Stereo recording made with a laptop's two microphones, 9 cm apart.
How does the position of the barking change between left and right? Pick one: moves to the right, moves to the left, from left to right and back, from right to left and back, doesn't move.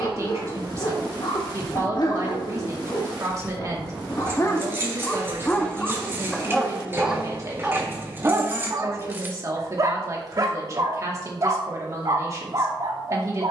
moves to the right.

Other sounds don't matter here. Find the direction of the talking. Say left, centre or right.
right.